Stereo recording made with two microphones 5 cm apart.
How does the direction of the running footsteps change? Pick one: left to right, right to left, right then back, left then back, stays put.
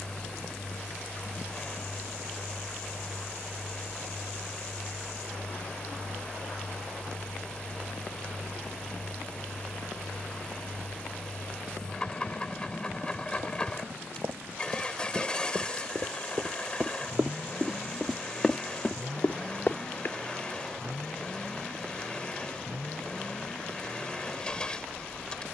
right to left.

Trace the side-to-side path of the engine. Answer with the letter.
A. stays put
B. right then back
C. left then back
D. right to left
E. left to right
A.